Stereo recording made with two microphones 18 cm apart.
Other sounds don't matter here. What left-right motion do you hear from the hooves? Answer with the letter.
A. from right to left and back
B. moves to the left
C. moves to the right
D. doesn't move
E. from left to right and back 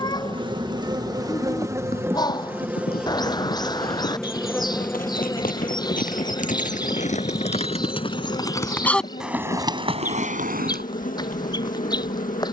C.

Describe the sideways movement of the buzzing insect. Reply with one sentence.
You can hear the buzzing insect move from right to left.